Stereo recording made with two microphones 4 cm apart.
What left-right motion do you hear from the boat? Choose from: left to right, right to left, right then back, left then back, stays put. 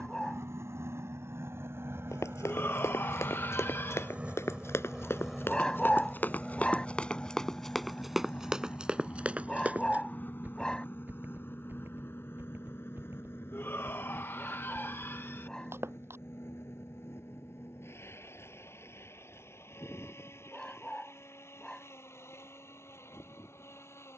right to left.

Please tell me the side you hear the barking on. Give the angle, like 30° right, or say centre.
20° left.